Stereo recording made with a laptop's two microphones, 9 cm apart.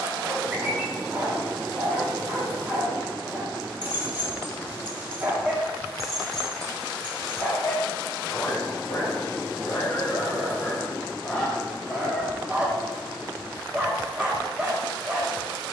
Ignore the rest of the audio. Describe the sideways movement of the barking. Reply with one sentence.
In this clip you hear the barking go left and come back.